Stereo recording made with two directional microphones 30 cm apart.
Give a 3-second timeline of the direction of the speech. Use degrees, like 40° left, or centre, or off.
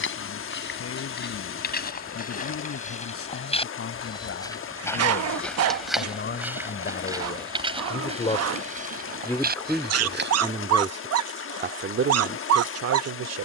50° left, 50° left, 30° left, 10° right, 50° right.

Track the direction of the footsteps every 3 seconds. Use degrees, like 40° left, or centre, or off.
30° left, 10° left, 20° right, 30° right, off.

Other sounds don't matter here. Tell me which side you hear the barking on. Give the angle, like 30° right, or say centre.
50° right.